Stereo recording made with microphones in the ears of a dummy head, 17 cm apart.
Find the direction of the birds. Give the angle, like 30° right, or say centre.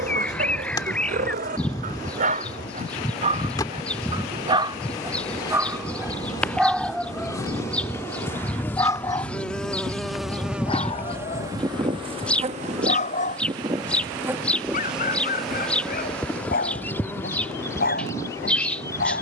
10° left.